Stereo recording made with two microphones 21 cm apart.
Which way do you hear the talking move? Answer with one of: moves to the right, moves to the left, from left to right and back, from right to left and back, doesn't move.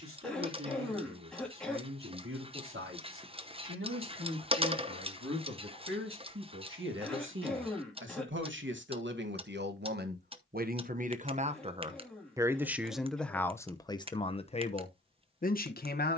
moves to the left.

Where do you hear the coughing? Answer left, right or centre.
centre.